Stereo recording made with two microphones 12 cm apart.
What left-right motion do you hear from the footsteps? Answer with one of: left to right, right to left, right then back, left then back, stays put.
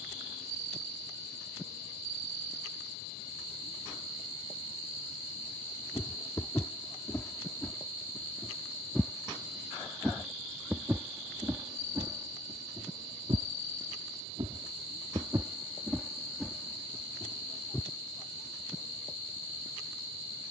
right then back.